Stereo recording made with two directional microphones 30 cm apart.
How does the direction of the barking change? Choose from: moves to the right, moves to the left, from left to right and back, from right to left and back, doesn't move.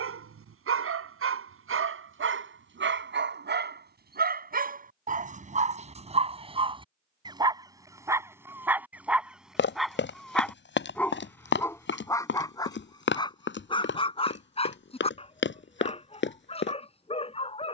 moves to the left.